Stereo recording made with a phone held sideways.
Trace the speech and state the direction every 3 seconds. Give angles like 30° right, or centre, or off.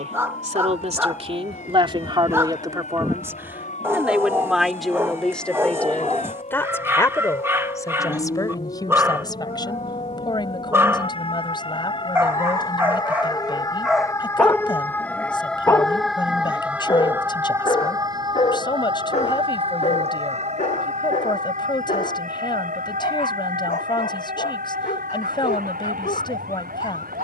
40° right, centre, 20° left, 30° left, 30° left, 30° left, 30° left, 30° left, 30° left.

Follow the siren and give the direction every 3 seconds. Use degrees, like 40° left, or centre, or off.
60° left, 60° left, 50° left, 40° left, 30° left, 10° right, 40° right, 60° right, 70° right.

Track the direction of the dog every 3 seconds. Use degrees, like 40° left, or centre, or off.
20° right, 20° right, 20° right, 20° right, 10° right, 30° left, 50° left, 60° left, 70° left.